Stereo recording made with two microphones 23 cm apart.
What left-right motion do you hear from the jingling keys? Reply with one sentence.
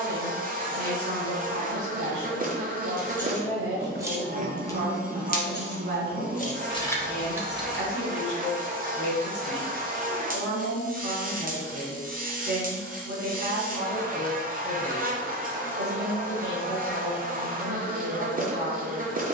You can hear the jingling keys move from right to left and back again.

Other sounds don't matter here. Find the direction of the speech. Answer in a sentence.
You can hear the speech on the right.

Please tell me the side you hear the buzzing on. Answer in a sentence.
In this clip you hear the buzzing on the right.